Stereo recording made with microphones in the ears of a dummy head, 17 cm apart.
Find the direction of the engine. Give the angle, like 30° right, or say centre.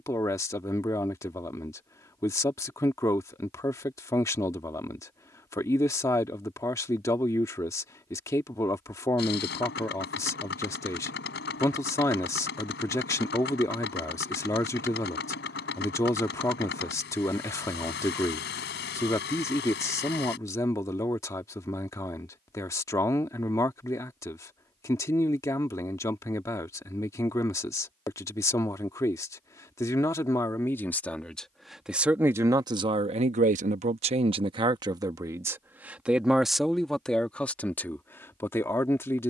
60° left.